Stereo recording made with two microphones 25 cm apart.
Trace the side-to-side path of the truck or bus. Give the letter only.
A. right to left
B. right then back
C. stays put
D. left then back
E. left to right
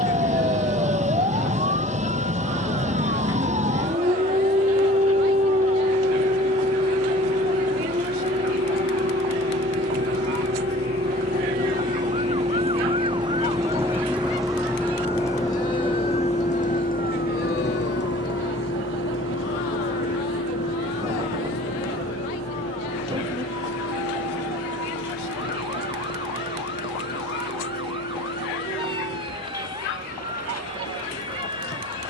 A.